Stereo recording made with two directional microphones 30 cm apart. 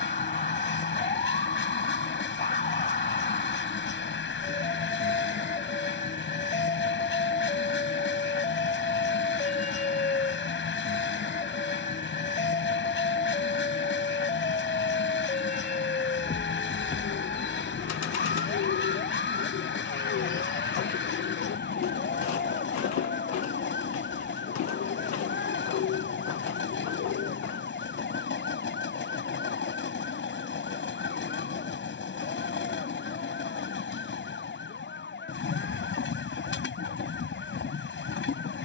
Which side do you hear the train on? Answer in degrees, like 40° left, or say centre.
40° left.